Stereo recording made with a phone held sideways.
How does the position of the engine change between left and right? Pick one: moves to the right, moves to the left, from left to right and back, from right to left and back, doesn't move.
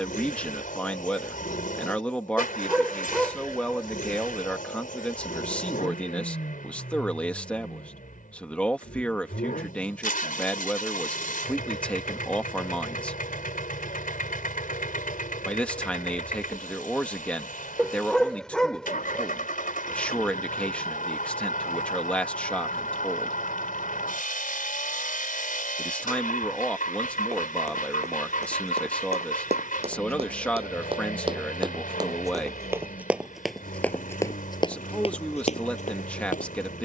doesn't move.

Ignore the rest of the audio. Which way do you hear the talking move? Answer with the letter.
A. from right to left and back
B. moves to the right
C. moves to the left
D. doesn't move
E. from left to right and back
D.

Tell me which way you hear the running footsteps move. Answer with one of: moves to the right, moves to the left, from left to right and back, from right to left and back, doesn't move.
moves to the left.